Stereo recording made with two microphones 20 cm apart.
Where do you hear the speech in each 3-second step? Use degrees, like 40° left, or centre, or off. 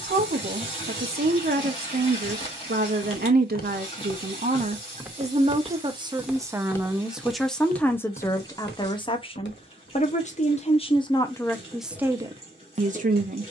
50° right, 40° right, centre, 20° left, 30° right.